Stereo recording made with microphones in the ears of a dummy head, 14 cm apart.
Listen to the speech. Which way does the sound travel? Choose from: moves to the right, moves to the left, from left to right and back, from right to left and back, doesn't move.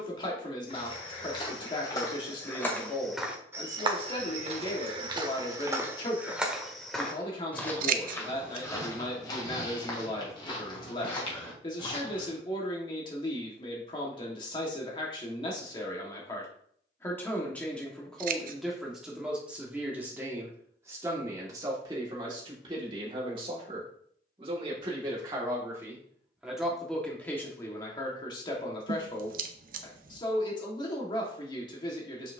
from left to right and back.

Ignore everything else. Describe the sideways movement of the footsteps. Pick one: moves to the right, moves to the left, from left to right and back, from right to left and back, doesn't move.
from left to right and back.